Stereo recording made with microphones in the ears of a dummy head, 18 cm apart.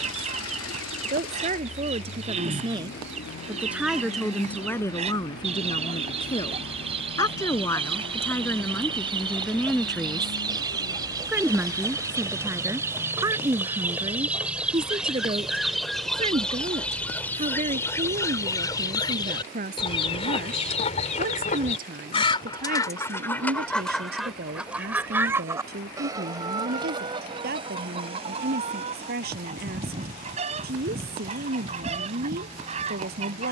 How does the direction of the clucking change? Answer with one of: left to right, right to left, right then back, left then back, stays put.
left then back.